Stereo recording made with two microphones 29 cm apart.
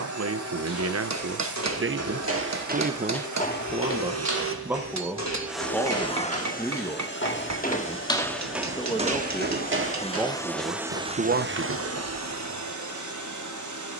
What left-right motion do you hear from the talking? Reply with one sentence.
You can hear the talking move from right to left and back again.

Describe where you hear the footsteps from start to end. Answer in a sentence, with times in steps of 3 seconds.
In this clip you hear the footsteps on the right from 0 s, on the left from 3 s and on the right from 9 s.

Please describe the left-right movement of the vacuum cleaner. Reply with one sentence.
In this clip you hear the vacuum cleaner go left and come back.